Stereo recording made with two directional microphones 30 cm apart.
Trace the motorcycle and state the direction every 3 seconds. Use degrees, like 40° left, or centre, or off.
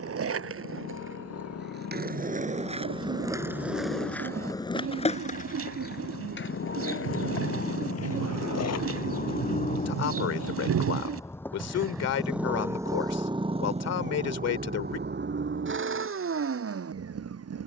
60° left, 50° left, 40° left, 20° left, 20° right, 40° right.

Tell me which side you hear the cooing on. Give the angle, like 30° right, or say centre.
50° right.